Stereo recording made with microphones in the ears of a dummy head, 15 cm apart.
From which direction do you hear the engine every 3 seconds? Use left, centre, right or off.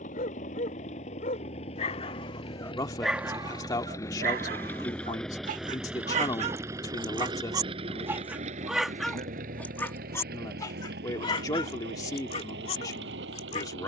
left, centre, right, right, right.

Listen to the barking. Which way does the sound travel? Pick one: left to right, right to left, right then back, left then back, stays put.
right then back.